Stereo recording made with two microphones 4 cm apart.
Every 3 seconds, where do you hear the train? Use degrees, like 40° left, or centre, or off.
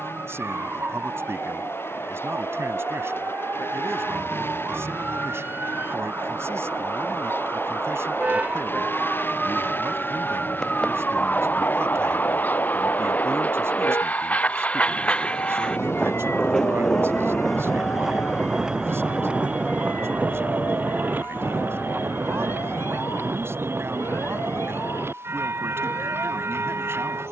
70° left, 60° left, 60° left, 50° left, 40° left, 10° left, 30° right, 60° right, 70° right.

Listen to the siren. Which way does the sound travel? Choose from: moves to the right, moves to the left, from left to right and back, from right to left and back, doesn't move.
moves to the left.